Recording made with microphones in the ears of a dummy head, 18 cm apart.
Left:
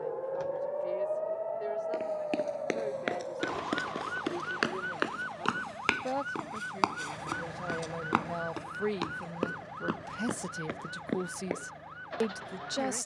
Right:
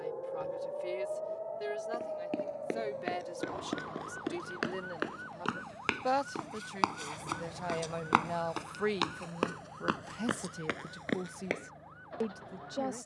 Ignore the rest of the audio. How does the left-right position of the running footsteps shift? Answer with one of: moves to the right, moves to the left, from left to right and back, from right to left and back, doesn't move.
moves to the right.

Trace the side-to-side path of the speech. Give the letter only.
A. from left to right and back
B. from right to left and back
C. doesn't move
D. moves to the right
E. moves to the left
E.